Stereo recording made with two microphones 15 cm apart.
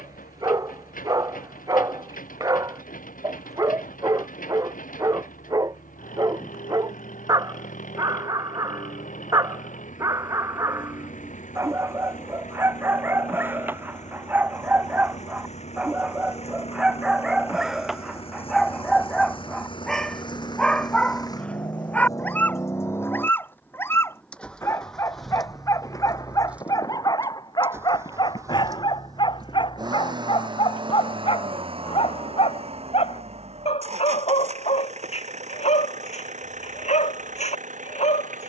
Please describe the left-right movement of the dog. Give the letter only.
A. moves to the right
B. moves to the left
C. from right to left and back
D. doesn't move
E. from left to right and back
B.